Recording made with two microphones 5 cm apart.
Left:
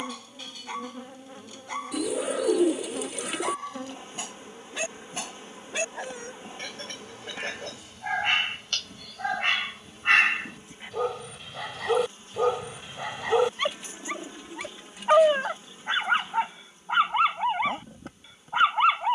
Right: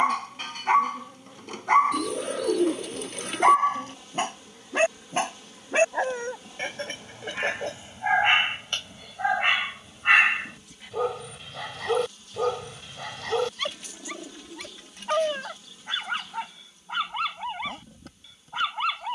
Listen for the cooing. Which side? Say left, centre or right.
centre.